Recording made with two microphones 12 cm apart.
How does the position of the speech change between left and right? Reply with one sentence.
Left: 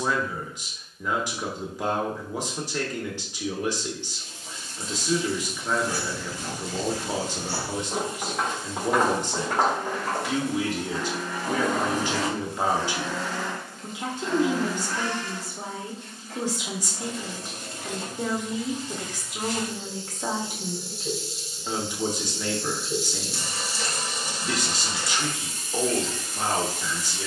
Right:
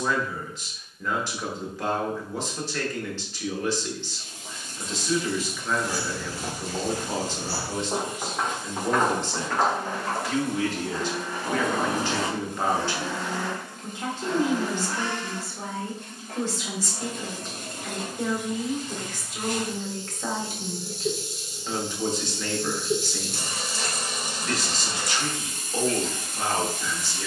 In this clip you hear the speech stay in one place.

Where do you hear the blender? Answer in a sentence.
You can hear the blender on the right.